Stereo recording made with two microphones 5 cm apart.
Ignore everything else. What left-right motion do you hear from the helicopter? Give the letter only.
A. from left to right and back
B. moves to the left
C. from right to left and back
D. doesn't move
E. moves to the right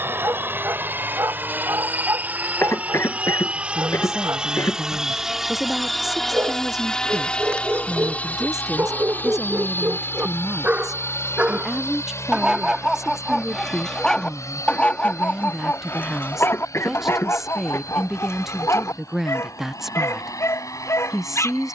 B.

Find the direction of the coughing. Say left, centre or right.
left.